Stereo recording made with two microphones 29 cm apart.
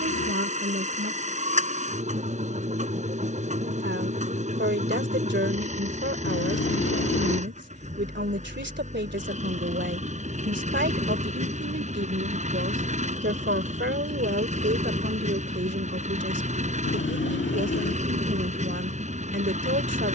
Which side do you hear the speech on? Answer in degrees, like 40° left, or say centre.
40° right.